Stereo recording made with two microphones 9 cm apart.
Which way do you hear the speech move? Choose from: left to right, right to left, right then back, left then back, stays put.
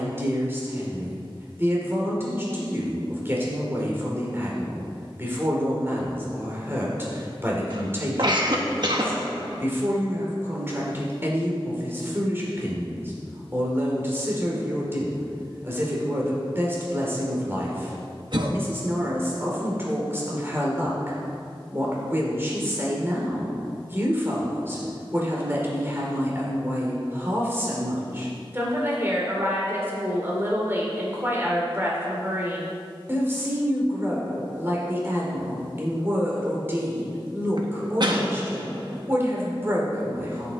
stays put.